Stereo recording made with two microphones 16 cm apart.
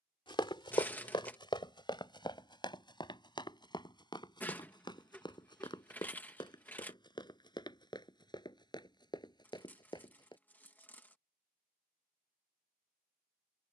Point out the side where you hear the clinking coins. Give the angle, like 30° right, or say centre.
10° left.